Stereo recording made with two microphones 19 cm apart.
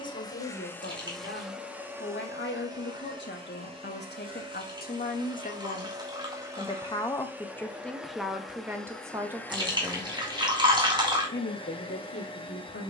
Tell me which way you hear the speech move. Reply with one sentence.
In this clip you hear the speech move from left to right and back again.